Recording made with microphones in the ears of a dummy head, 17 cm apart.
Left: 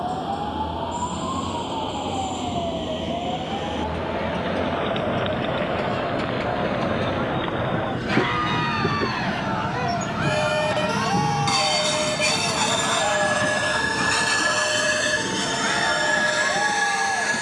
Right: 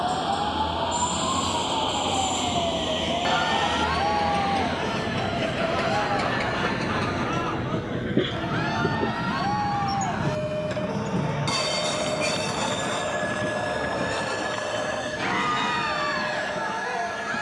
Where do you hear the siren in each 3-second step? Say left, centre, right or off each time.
right, right, centre, left, left, left.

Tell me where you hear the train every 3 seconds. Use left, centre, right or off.
right, right, right, centre, left, left.